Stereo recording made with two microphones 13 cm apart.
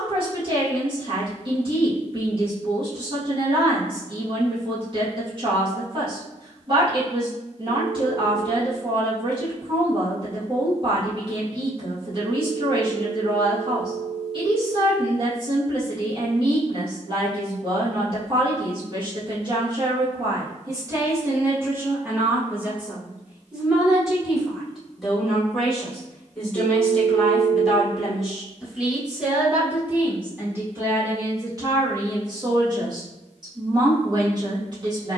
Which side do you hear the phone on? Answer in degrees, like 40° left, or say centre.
40° left.